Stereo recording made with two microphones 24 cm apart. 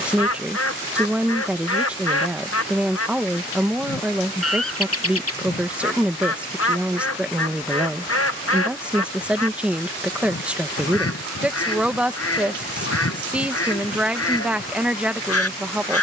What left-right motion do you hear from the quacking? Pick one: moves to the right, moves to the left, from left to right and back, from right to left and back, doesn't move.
doesn't move.